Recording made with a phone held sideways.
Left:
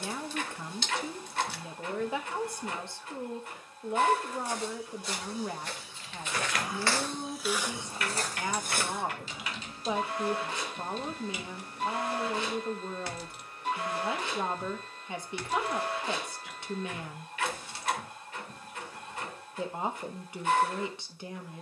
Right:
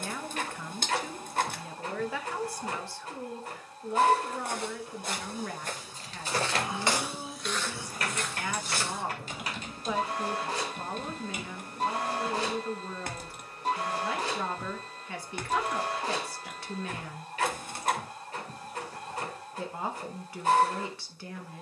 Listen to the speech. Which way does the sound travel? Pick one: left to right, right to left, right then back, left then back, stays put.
stays put.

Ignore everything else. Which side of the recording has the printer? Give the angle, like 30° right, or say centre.
40° right.